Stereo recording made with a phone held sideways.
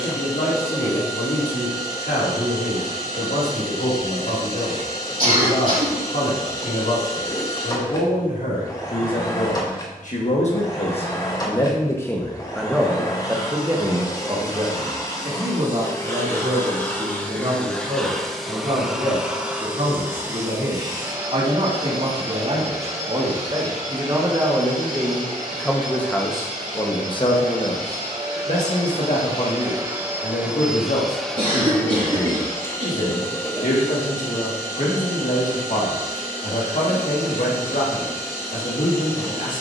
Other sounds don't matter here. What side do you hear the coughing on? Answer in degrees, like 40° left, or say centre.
70° right.